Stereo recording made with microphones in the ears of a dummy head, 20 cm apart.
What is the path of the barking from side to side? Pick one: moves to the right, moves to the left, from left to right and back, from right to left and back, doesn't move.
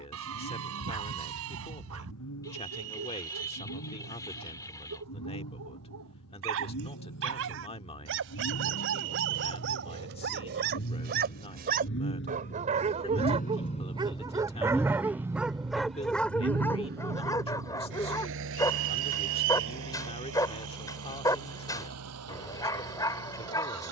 moves to the left.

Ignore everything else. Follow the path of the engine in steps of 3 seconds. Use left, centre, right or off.
left, left, left, left, left, right, right, right.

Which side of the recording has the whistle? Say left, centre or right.
right.